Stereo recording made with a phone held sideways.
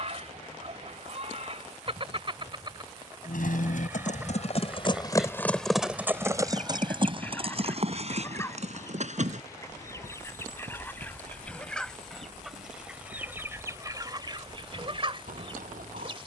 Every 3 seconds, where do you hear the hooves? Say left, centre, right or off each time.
off, left, right, right, right, right.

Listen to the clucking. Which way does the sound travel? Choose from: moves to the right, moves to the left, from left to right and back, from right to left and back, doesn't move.
from right to left and back.